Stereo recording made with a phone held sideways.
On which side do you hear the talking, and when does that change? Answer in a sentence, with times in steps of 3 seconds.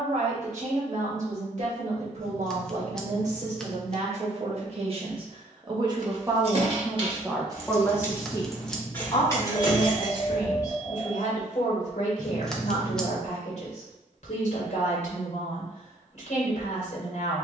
In this clip you hear the talking on the right from 0 s, in the centre from 6 s and on the left from 9 s.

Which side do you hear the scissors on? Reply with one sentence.
In this clip you hear the scissors in the centre.